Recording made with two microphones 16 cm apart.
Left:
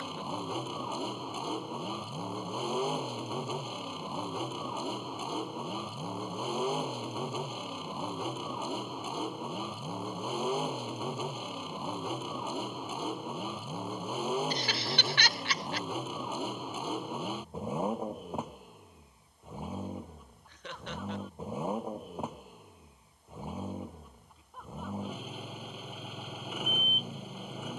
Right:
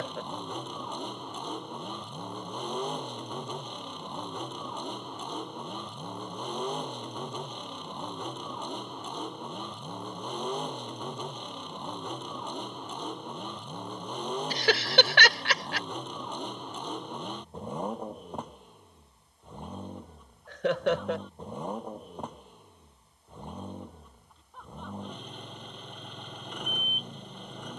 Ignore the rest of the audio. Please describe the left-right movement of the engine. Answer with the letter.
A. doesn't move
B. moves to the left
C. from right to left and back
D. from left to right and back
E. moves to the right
A.